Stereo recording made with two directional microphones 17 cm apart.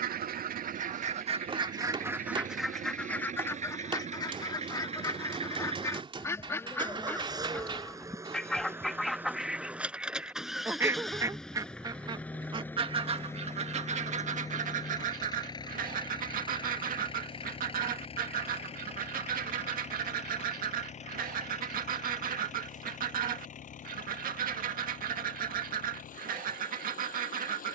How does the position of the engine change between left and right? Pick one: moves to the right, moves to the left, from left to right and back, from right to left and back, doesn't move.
moves to the left.